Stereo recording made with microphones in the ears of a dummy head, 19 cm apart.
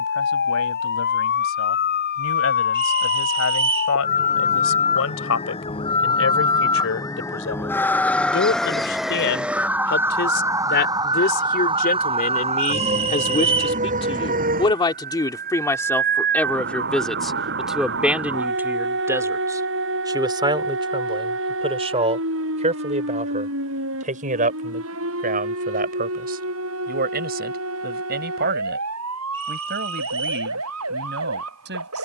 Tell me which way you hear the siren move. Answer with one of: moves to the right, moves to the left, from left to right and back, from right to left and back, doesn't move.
moves to the right.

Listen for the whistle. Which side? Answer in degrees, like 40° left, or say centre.
30° right.